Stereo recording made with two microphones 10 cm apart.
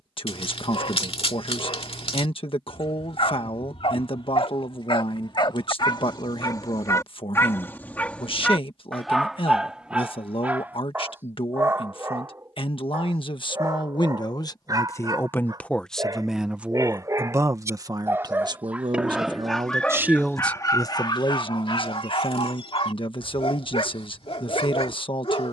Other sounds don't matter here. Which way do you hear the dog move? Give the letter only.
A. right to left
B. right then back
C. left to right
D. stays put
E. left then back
B.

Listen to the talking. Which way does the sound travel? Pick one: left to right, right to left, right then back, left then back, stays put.
right then back.